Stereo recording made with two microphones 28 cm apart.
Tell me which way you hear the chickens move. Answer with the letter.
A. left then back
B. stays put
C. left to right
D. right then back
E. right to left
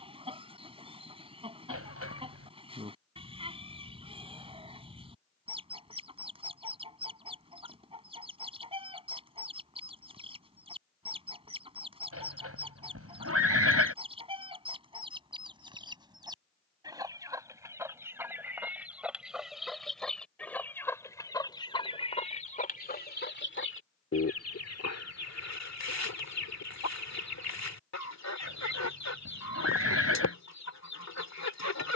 E.